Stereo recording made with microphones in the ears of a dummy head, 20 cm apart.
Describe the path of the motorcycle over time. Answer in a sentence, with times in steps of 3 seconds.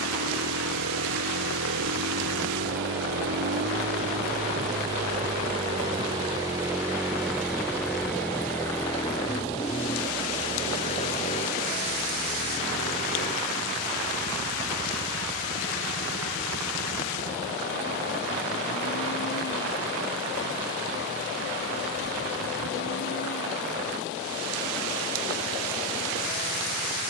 In this clip you hear the motorcycle on the right from 0 s, in the centre from 6 s and on the left from 9 s.